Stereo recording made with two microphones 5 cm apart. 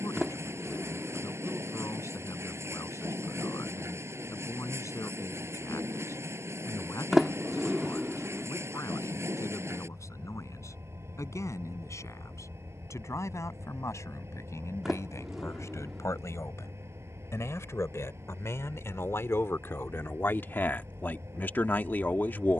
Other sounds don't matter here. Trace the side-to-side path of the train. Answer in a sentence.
In this clip you hear the train stay put.